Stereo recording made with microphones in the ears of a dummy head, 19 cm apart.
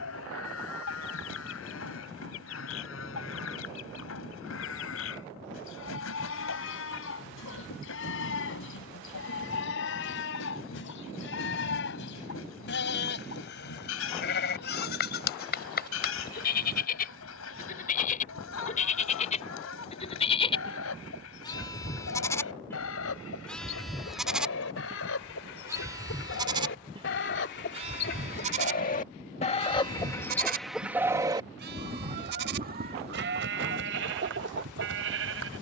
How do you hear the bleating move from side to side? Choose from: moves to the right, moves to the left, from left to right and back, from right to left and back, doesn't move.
moves to the right.